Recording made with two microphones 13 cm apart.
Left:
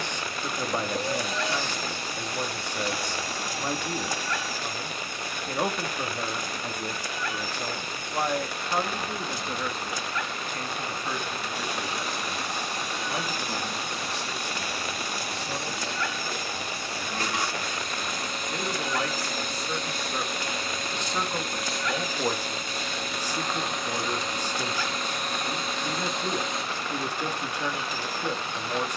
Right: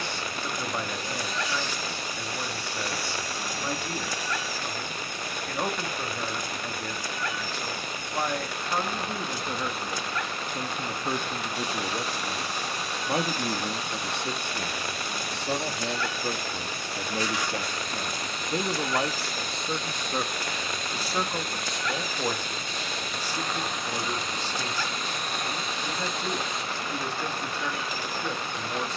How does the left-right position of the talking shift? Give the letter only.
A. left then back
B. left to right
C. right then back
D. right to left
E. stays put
C.